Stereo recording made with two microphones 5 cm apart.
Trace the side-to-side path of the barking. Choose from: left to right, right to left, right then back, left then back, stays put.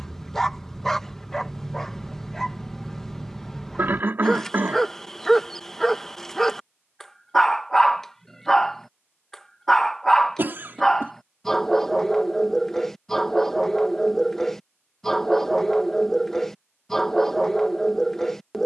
stays put.